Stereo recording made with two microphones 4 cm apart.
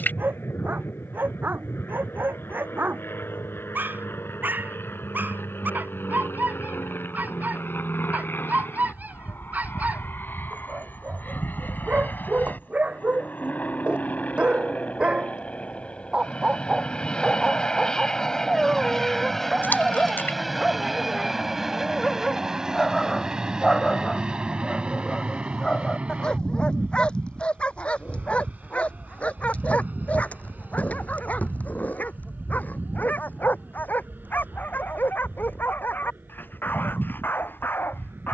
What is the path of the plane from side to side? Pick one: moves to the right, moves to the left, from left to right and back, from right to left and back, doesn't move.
moves to the right.